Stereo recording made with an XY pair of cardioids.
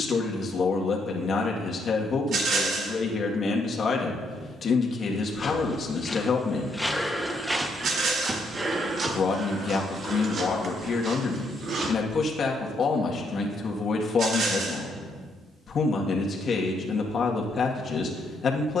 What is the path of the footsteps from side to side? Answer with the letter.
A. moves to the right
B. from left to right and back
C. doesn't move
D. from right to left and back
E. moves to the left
A.